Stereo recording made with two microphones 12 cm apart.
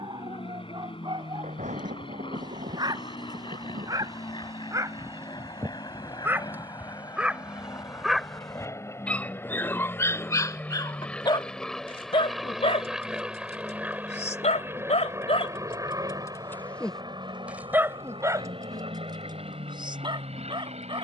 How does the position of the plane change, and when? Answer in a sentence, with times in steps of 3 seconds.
You can hear the plane on the left from 0 s, in the centre from 9 s and on the right from 15 s.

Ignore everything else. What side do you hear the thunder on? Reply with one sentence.
In this clip you hear the thunder on the right.